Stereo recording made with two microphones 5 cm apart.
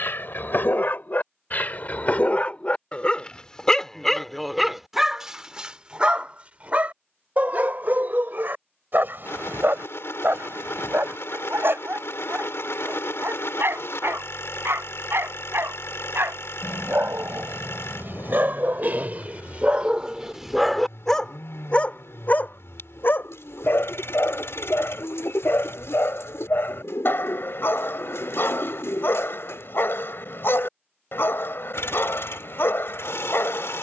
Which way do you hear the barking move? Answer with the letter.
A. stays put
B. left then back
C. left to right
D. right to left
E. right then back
E.